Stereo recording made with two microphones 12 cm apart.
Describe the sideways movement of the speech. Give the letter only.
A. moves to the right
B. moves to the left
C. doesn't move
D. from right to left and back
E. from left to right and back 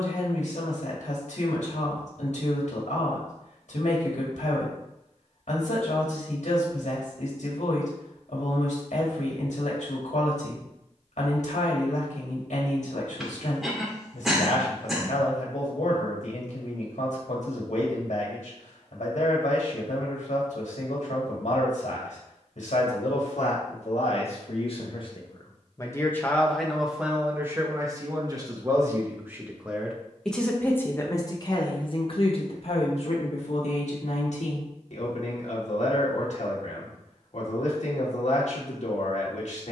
E.